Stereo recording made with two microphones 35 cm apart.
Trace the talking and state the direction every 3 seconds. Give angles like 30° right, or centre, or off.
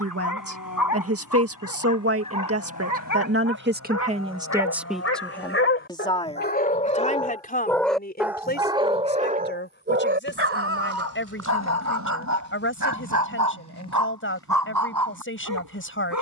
40° right, 10° right, 20° left, 30° left, 40° left, 40° left.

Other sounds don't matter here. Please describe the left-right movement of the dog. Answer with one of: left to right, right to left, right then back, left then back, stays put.
left to right.